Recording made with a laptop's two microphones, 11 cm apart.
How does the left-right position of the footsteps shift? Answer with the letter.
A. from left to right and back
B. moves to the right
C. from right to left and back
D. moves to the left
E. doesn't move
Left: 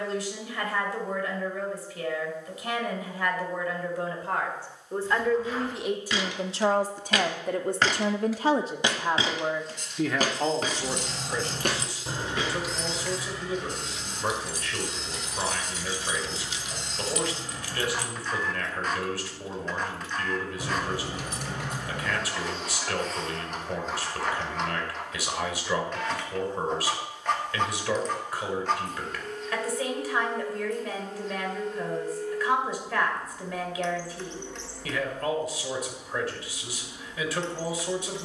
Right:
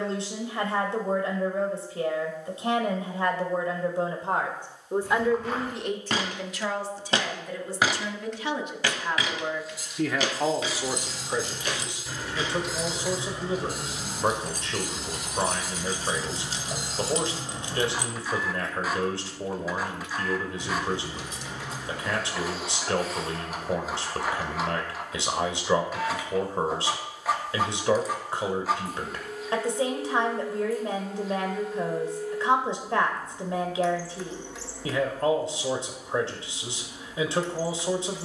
D.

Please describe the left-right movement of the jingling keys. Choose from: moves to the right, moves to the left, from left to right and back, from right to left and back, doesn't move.
from left to right and back.